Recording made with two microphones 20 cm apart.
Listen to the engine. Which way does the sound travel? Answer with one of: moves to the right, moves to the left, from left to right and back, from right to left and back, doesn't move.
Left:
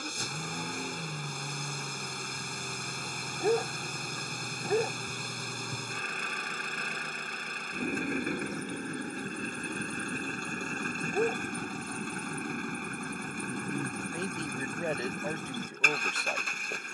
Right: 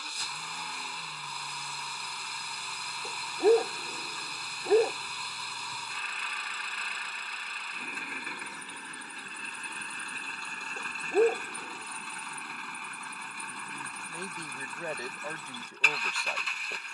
doesn't move.